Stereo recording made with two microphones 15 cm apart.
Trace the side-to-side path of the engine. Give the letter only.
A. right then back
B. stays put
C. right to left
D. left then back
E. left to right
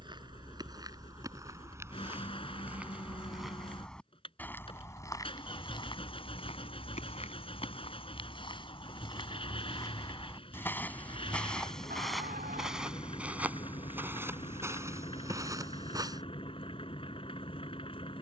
B.